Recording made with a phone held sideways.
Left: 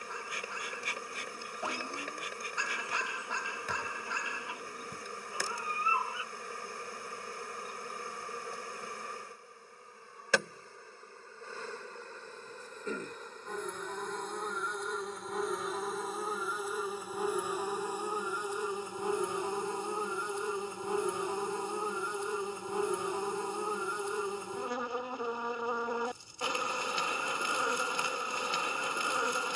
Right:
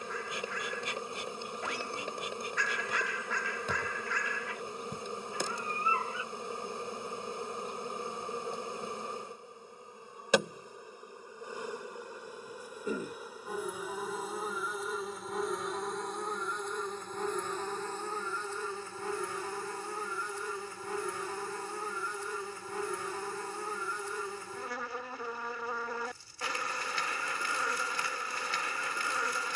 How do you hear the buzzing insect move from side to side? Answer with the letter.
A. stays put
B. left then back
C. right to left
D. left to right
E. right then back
C.